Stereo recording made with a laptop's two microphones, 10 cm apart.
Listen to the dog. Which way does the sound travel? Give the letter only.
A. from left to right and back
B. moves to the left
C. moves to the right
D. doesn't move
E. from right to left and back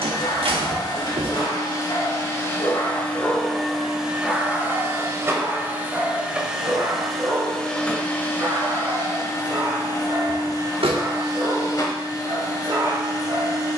C.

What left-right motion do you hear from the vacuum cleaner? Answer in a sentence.
In this clip you hear the vacuum cleaner move from left to right and back again.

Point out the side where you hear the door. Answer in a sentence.
In this clip you hear the door on the right.